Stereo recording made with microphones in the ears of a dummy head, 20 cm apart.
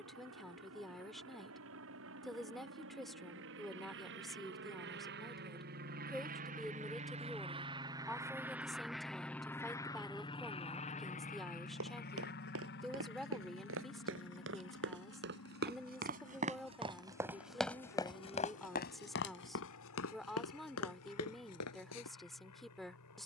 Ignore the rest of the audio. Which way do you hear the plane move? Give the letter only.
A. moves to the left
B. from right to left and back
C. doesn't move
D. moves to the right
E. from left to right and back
A.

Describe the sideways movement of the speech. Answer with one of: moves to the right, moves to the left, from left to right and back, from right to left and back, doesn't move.
doesn't move.